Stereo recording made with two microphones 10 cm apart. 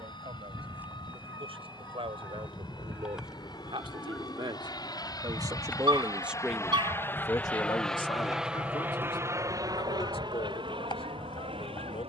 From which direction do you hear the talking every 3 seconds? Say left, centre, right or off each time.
right, right, left, left.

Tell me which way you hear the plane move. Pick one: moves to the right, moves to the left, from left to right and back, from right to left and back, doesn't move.
moves to the right.